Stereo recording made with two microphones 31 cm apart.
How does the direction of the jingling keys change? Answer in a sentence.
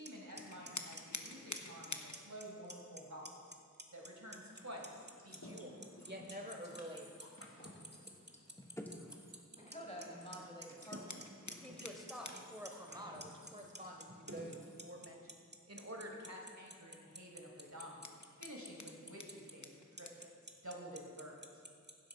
You can hear the jingling keys move from left to right.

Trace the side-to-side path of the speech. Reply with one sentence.
In this clip you hear the speech go left and come back.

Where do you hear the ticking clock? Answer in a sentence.
In this clip you hear the ticking clock on the right.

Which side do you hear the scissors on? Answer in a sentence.
You can hear the scissors on the left.